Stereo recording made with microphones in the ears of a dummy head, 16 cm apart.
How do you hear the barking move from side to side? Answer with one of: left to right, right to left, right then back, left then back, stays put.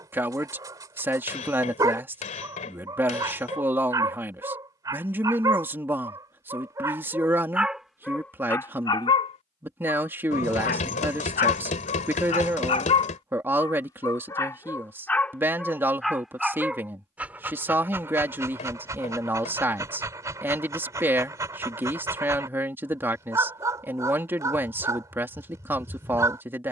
left then back.